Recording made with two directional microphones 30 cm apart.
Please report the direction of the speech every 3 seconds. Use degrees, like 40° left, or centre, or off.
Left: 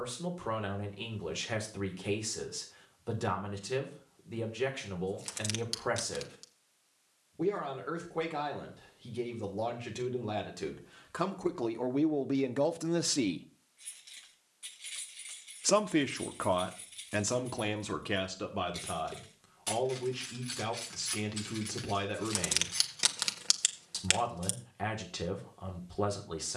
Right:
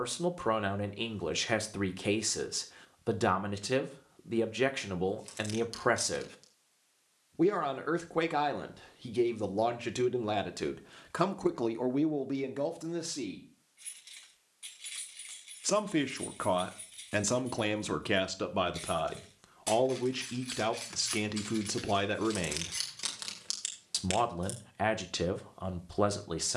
40° right, 40° right, 40° right, 30° right, 30° left, 10° right, 30° right, 40° right, 40° right.